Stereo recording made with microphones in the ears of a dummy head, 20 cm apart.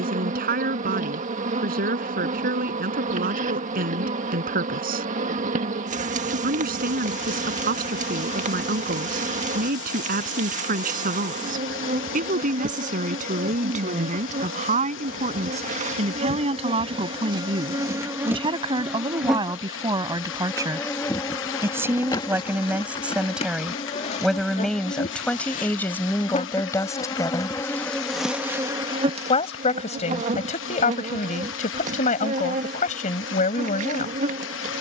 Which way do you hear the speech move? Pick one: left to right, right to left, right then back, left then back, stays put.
right to left.